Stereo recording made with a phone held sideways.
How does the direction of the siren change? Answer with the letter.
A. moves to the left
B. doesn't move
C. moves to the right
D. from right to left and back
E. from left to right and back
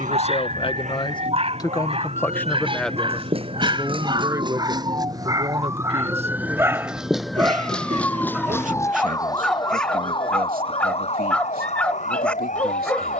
A.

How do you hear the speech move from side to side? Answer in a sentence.
You can hear the speech move to the right.